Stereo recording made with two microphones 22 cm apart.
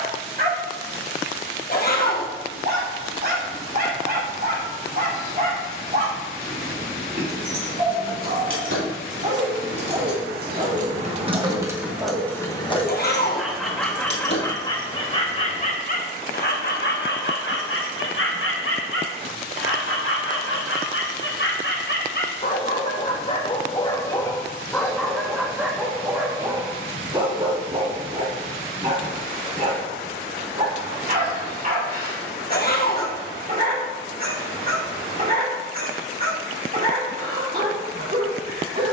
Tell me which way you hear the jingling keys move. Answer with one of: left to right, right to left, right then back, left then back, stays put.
right to left.